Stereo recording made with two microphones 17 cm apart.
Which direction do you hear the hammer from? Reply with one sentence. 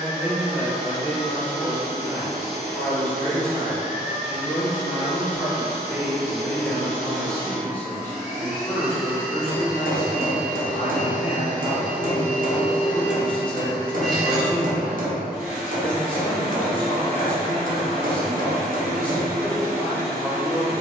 In this clip you hear the hammer on the right.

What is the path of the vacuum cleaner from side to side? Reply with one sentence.
In this clip you hear the vacuum cleaner go left and come back.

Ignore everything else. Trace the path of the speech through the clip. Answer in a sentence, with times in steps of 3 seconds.
In this clip you hear the speech on the left from 0 s, in the centre from 3 s and on the left from 9 s.